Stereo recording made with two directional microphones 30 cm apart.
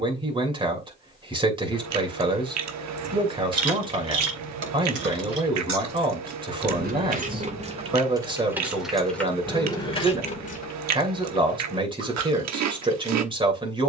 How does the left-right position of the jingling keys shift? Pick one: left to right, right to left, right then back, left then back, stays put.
right to left.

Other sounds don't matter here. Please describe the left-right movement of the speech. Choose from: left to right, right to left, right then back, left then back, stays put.
stays put.